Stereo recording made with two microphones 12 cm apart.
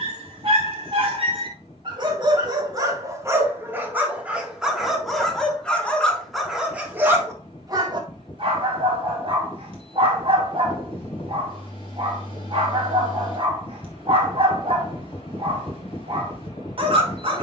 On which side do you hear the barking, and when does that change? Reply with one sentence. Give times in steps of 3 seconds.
In this clip you hear the barking on the right from 0 s, in the centre from 3 s and on the right from 6 s.